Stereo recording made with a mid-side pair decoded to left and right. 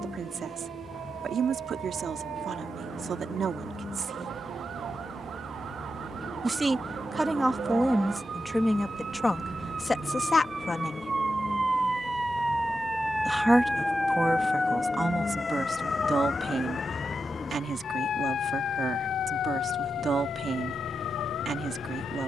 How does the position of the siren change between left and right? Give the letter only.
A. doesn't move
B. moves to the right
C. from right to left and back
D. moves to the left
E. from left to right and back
D.